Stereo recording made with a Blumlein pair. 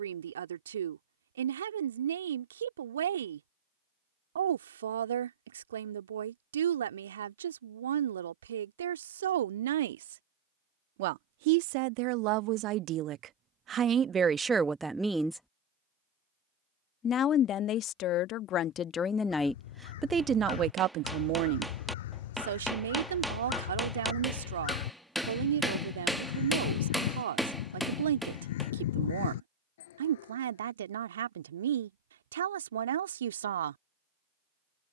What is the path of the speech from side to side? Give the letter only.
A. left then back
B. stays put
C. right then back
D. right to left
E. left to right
A.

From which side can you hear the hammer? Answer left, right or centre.
centre.